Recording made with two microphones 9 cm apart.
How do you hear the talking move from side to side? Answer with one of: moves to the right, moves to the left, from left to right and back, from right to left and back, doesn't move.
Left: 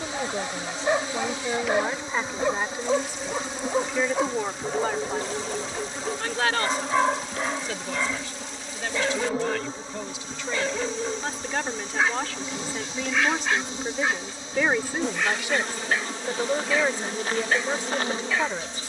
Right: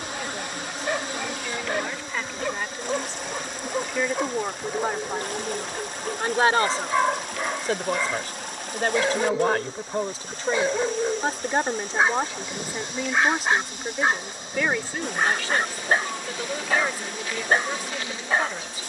from left to right and back.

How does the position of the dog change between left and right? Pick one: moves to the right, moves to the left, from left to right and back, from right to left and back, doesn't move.
moves to the right.